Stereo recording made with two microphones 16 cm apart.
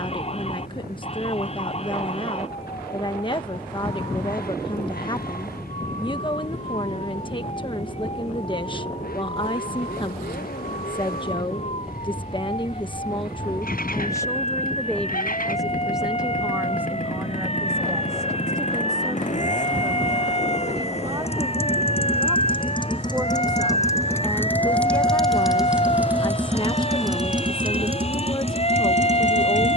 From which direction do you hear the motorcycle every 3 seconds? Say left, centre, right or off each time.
left, left, left, left, left, left, left, left, centre, right.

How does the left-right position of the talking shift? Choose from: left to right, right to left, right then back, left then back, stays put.
right then back.